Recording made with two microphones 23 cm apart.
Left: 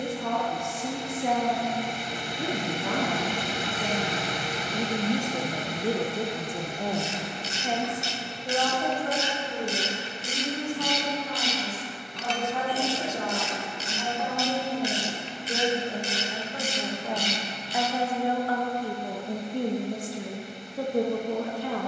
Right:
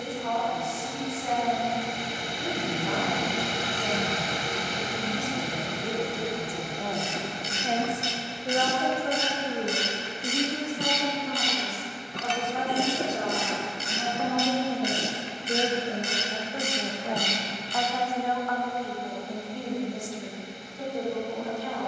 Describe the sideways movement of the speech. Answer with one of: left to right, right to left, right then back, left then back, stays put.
right then back.